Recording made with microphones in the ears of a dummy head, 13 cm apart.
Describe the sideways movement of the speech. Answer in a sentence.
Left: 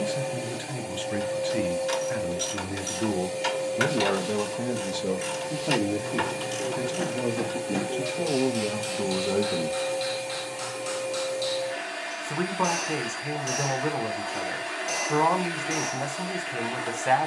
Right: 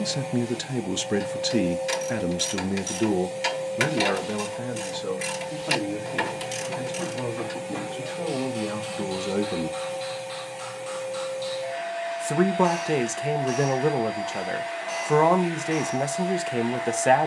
You can hear the speech go left and come back.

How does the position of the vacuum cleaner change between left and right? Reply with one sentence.
In this clip you hear the vacuum cleaner stay in one place.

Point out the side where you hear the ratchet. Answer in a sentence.
In this clip you hear the ratchet in the centre.